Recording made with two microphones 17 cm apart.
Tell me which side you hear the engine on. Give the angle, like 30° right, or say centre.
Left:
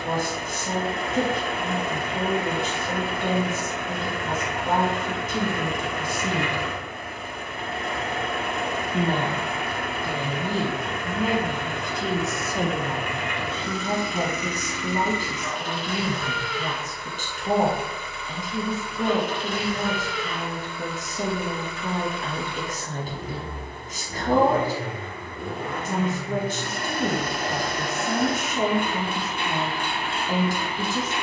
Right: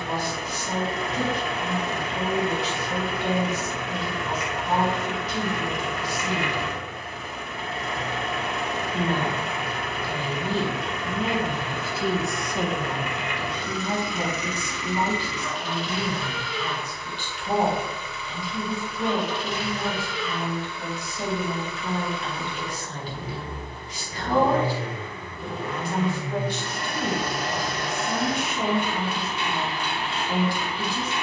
50° left.